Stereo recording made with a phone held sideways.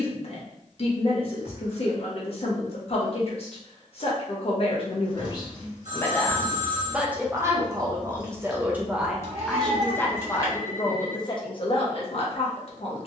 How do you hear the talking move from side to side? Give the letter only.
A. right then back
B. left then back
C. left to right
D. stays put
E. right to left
A.